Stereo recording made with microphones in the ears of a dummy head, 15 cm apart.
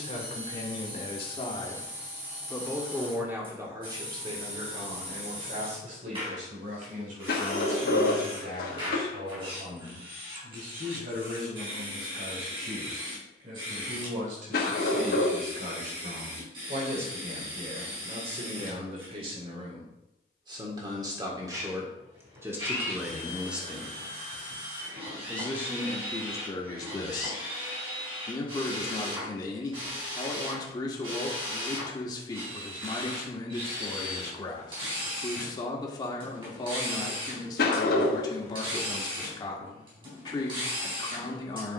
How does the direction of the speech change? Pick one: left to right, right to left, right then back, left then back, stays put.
right then back.